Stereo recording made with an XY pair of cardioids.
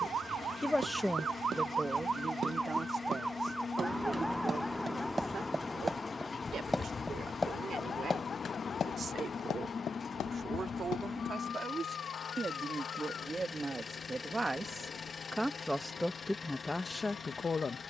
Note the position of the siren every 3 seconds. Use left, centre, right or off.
right, centre, left, left, left, left.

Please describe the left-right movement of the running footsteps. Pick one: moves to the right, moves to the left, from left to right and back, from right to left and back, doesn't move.
moves to the left.